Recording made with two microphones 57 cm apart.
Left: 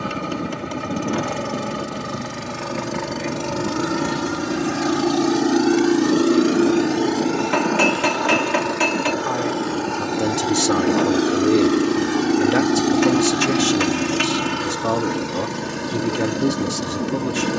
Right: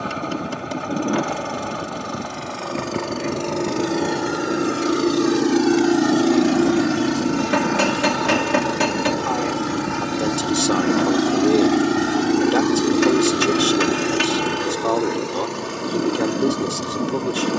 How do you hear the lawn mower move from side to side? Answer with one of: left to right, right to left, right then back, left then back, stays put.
right then back.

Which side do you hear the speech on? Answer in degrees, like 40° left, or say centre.
50° left.